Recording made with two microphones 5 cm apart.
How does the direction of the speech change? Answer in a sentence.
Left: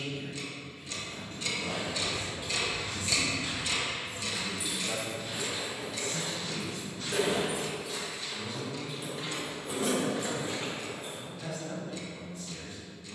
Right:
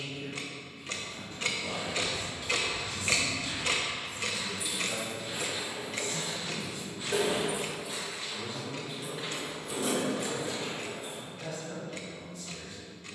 You can hear the speech go right and come back.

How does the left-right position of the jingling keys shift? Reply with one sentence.
You can hear the jingling keys move from left to right and back again.